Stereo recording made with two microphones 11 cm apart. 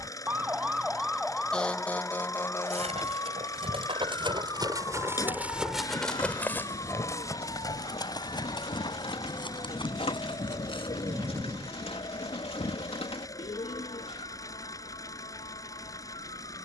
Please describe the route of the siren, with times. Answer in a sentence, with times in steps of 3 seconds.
You can hear the siren in the centre from 0 s and on the left from 3 s.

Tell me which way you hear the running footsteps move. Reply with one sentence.
You can hear the running footsteps move to the left.